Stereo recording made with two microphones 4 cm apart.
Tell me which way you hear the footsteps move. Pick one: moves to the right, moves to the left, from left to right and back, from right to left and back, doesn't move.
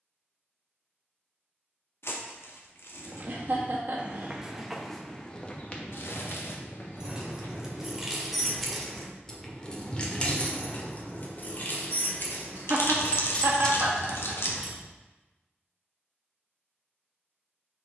moves to the left.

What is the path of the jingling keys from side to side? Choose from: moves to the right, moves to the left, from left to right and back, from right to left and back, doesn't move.
from right to left and back.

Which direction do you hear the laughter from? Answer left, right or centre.
right.